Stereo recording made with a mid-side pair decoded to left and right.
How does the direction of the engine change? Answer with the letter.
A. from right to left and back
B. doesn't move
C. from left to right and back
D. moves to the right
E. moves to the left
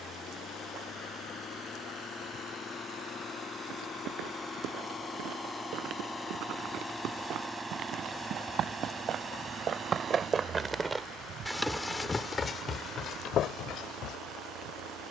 D.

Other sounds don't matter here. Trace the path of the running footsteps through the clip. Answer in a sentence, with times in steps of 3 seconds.
In this clip you hear the running footsteps not at all from 0 s, on the right from 3 s and on the left from 12 s.